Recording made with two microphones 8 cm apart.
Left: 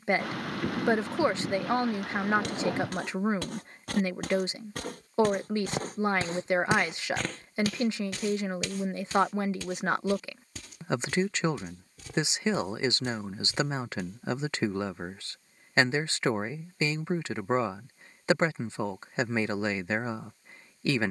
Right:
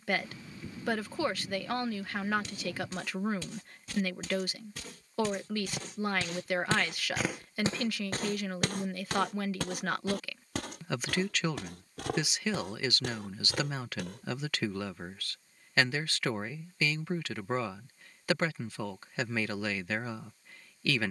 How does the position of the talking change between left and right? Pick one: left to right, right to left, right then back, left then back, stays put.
stays put.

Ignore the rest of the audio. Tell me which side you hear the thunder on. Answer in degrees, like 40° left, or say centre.
80° left.